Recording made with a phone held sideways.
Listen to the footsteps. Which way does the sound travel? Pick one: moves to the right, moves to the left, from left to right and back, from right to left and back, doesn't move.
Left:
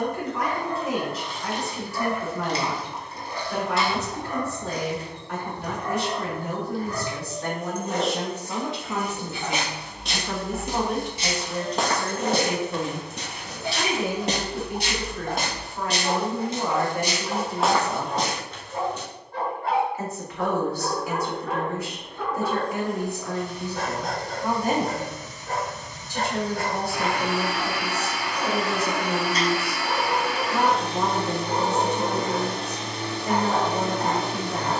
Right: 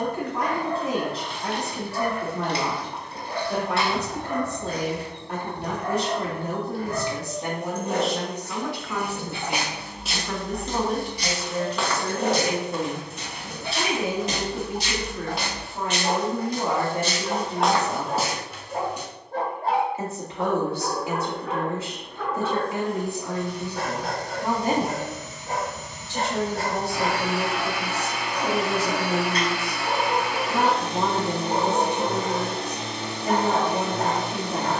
from right to left and back.